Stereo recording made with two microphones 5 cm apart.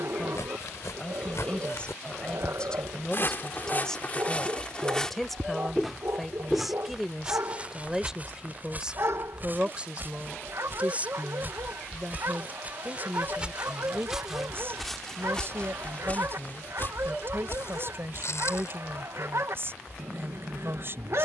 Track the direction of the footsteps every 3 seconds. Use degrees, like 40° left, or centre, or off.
70° left, 30° left, 30° right, 40° right, 20° right, 40° left, 70° left.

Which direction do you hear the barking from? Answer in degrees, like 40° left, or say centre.
60° right.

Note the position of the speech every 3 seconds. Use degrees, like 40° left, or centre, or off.
20° left, 10° left, 10° right, 20° right, 40° right, 50° right, 50° right.